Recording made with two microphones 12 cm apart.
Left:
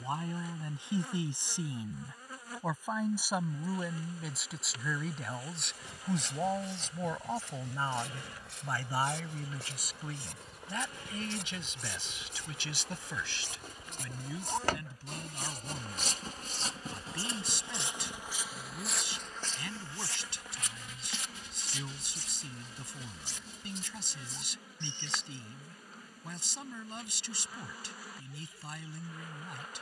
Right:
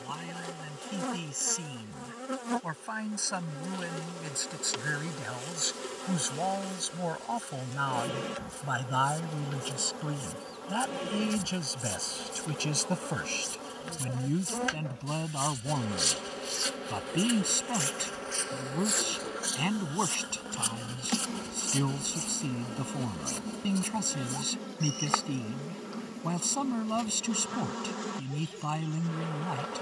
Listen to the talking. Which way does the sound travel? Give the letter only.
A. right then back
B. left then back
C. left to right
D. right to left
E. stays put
C.